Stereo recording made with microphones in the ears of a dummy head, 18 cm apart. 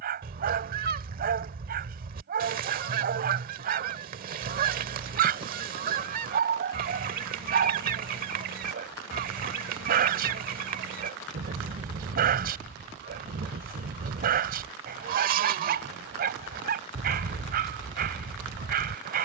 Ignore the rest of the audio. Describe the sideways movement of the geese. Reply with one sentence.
You can hear the geese stay put.